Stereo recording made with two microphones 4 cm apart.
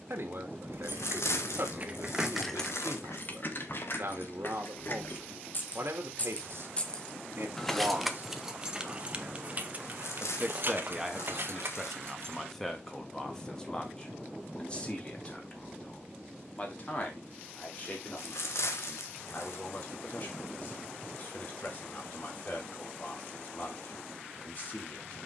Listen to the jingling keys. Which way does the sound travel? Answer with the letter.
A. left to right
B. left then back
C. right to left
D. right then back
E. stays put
B.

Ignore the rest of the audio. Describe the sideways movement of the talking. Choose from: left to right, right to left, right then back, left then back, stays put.
right to left.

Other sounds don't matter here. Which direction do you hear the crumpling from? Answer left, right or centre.
left.